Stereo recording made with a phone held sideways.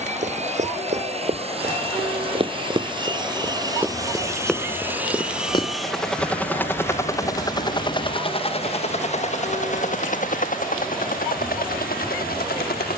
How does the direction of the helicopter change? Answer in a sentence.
You can hear the helicopter go from the right side to the left.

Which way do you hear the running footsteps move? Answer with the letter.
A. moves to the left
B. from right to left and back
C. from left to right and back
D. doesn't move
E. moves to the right
A.